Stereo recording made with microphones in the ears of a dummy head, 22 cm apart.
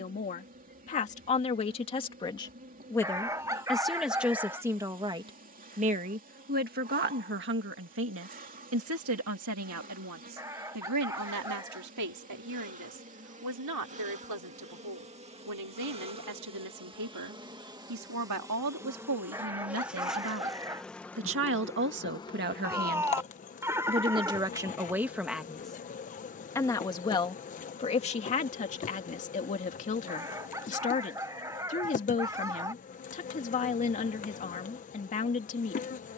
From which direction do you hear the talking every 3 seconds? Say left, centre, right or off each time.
left, centre, right, right, right, right, right, right, centre, left, left, left.